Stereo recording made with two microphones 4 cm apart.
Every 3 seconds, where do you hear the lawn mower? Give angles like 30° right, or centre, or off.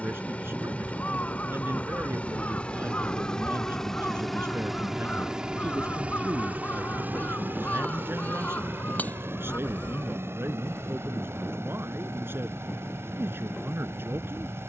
30° left, centre, 50° right, 70° right, 80° right.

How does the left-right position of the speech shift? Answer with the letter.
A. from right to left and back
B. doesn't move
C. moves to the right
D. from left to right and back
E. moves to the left
B.